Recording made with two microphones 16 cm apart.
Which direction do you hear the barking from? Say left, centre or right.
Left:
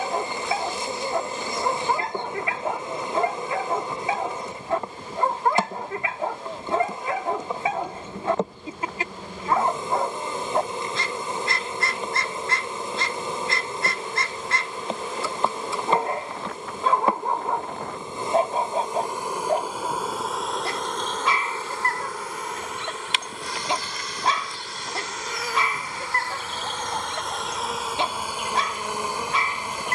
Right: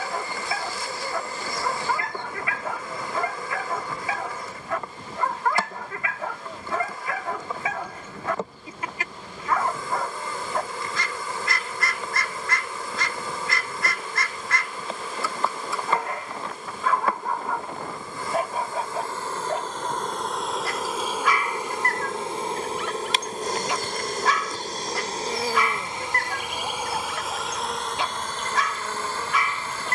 left.